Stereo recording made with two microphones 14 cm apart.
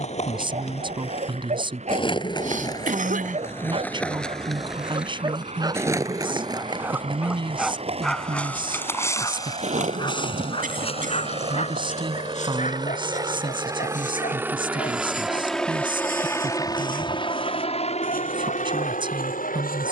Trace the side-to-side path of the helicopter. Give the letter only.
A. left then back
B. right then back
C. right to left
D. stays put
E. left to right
C.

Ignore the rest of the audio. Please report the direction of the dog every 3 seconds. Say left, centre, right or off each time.
right, right, centre, left, left, left, left.